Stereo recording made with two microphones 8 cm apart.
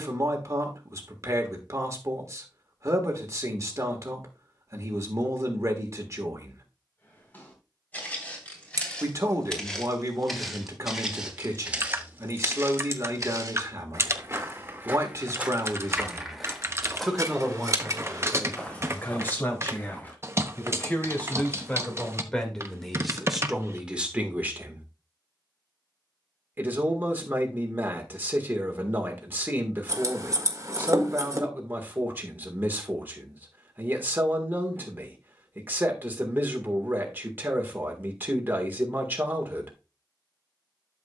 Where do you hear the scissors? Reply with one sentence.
You can hear the scissors on the right.